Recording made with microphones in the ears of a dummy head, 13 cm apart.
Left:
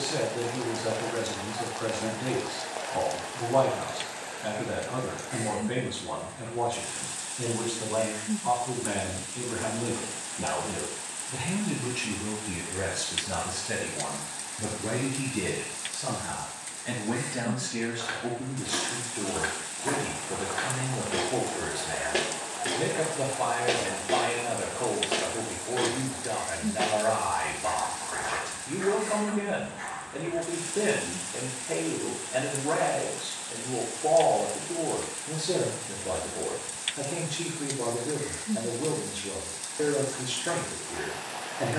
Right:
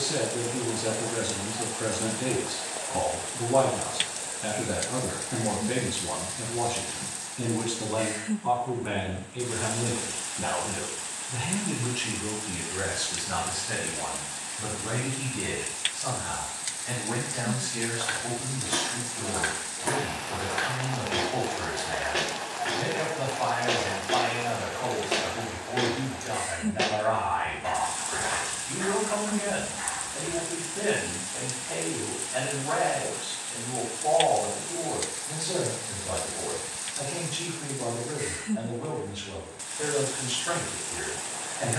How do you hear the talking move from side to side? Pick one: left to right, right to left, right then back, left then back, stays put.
right to left.